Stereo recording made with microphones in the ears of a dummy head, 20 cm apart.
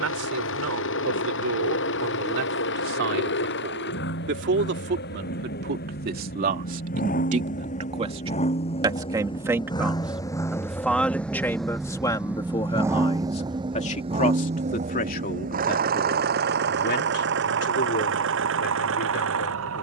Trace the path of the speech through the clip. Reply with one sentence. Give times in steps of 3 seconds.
You can hear the speech on the right from 0 s, in the centre from 9 s and on the left from 12 s.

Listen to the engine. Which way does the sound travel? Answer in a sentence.
You can hear the engine go from the left side to the right.